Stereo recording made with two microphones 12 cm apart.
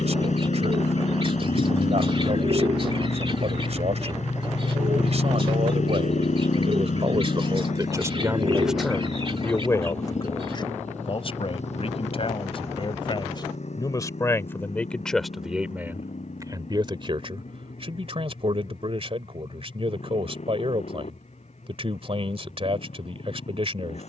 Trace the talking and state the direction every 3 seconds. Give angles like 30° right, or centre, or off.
50° right, 50° right, 30° right, 30° left, 30° left, 20° right, 50° right, 50° right.